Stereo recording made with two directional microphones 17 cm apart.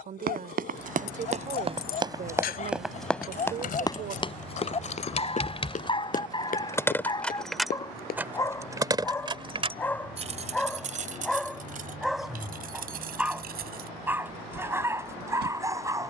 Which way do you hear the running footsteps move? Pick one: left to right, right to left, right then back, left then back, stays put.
right to left.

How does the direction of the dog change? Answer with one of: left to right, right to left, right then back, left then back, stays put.
left to right.